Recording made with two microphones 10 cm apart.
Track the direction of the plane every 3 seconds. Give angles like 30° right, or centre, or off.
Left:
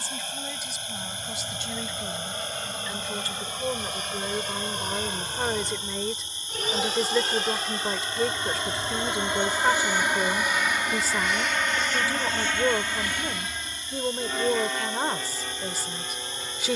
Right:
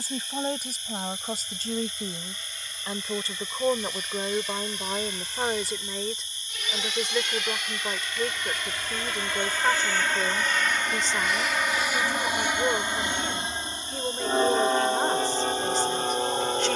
60° left, 60° left, 40° left, 10° left, 20° right, 40° right.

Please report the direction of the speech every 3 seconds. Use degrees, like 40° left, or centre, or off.
40° right, 20° right, 10° left, 10° left, 10° left, 10° left.